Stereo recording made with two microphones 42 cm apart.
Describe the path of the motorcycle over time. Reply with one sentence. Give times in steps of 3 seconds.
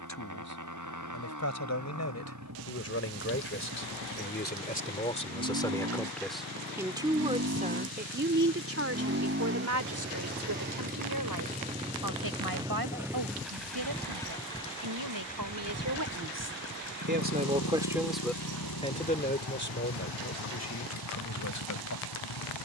You can hear the motorcycle on the right from 0 s, in the centre from 12 s and on the left from 15 s.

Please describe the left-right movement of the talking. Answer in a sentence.
In this clip you hear the talking move from left to right and back again.